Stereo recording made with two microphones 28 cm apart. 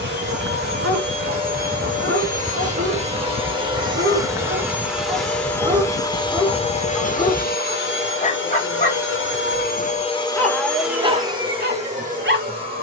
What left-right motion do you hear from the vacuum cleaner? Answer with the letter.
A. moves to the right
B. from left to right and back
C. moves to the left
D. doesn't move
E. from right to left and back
E.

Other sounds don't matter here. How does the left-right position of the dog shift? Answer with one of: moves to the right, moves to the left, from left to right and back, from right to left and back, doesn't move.
from right to left and back.